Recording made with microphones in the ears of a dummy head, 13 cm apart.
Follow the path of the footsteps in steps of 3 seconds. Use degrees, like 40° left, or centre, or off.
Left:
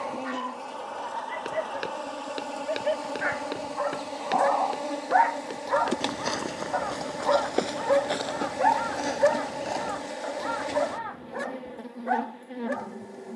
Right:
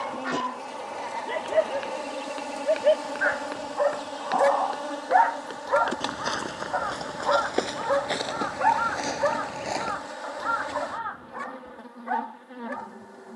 50° left, 30° left, centre, 10° right, off.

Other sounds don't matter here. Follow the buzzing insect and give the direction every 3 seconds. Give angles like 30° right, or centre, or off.
10° right, 10° left, 20° left, 30° left, 30° left.